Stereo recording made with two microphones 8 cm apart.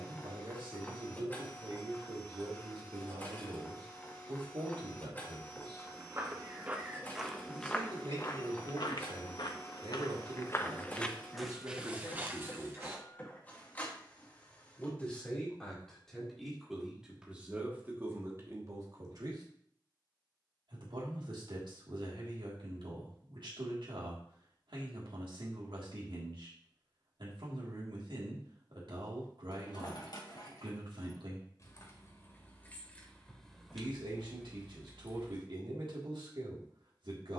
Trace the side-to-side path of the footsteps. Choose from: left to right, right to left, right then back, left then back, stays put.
left then back.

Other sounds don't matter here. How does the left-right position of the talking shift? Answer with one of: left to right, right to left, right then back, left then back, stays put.
left then back.